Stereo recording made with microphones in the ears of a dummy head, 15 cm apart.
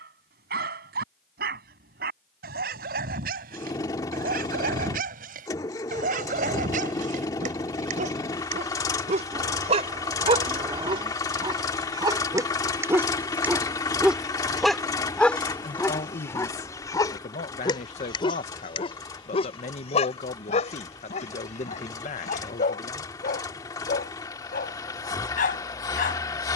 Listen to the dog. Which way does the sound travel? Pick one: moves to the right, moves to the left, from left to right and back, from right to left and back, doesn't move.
moves to the left.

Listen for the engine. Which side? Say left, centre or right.
left.